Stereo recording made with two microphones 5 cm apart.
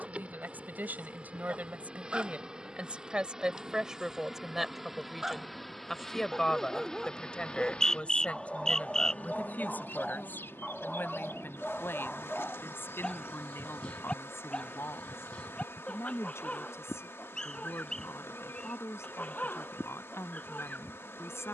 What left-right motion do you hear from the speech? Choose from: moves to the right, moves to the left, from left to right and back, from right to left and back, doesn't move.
moves to the left.